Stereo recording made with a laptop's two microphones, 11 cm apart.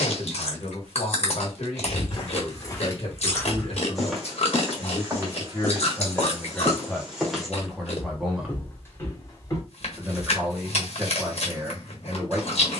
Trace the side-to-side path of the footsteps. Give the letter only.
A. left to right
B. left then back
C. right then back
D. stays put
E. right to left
C.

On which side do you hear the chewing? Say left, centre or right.
left.